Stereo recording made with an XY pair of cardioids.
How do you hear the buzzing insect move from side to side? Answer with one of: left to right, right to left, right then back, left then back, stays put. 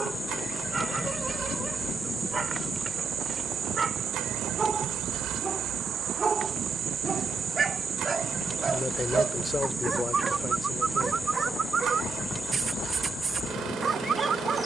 right then back.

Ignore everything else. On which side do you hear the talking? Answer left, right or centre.
left.